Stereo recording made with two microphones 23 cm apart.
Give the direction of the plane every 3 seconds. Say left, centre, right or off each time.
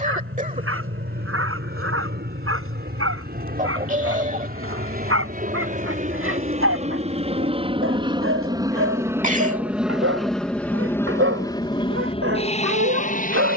right, right, right, centre, left.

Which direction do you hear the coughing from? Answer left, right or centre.
right.